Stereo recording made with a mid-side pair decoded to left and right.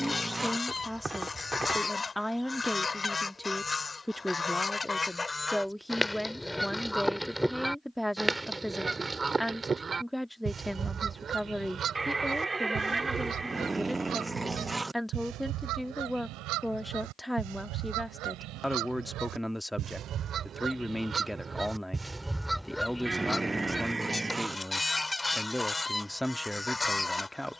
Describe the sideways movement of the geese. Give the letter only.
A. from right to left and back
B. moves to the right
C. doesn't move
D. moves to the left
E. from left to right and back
E.